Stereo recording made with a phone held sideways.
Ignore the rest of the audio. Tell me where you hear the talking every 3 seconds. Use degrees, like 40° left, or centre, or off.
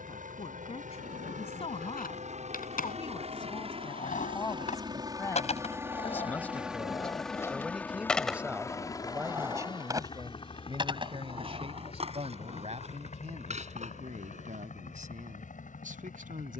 40° left, 30° left, centre, 30° right, 50° right, 60° right.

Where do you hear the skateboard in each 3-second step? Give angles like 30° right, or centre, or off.
70° left, 60° left, 20° left, 30° right, 50° right, off.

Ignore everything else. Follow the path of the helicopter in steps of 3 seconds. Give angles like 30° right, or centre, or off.
60° right, 30° right, 10° left, 30° left, 50° left, 60° left.